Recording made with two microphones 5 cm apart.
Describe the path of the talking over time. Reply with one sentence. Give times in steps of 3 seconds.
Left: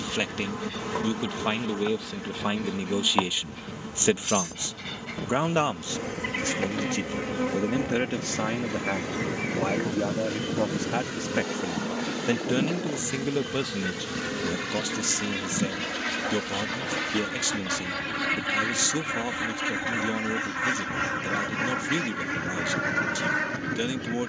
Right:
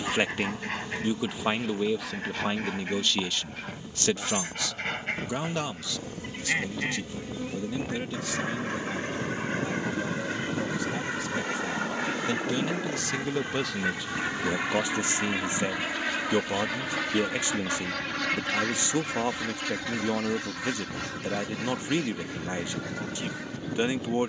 You can hear the talking in the centre from 0 s, on the left from 3 s, in the centre from 12 s and on the right from 15 s.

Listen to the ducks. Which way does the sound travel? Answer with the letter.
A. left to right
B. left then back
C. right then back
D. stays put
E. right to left
E.